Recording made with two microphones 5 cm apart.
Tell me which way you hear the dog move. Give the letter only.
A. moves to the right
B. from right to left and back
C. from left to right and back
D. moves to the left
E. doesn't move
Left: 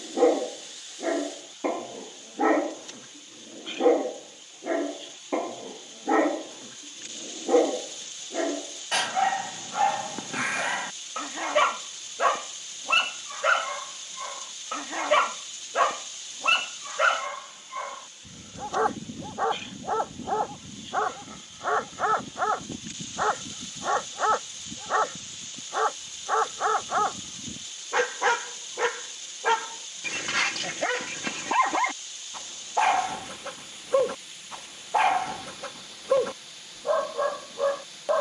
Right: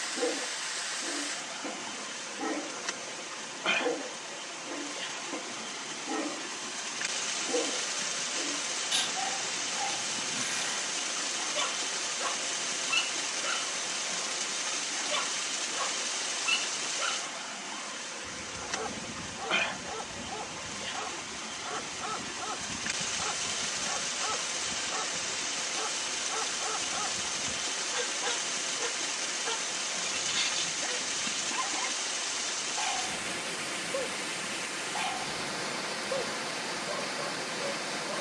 E.